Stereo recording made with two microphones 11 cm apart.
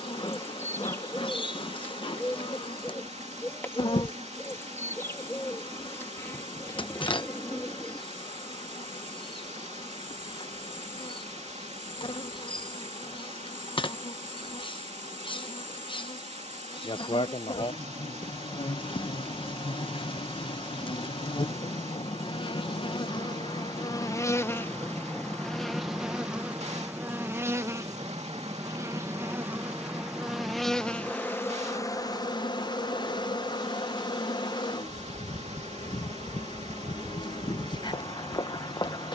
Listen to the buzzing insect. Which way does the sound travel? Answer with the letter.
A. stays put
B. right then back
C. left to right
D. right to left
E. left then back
B.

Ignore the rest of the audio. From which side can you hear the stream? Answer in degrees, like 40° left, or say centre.
80° right.